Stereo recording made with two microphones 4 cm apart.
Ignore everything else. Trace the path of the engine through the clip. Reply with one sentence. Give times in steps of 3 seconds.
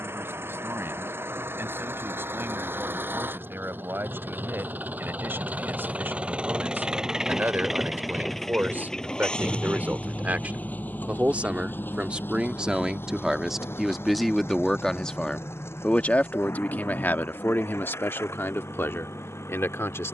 In this clip you hear the engine on the right from 0 s, in the centre from 6 s and on the left from 9 s.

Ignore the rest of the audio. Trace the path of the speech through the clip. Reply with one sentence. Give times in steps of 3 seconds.
You can hear the speech on the right from 0 s, in the centre from 12 s and on the left from 15 s.